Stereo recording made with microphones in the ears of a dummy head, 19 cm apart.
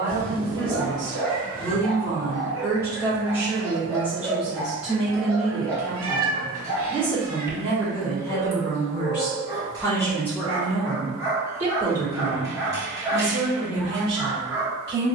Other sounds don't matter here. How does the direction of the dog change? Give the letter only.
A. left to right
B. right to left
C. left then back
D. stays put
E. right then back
D.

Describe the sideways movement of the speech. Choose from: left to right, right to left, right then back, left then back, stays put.
left then back.